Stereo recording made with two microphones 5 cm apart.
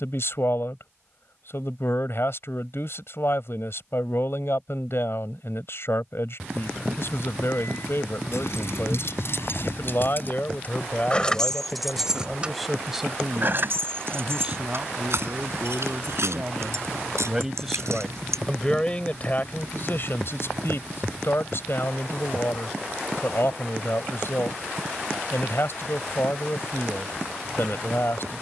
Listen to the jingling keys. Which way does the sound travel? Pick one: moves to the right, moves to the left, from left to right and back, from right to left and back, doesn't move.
moves to the right.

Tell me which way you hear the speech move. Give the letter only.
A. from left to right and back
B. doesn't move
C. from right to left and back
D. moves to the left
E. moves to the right
A.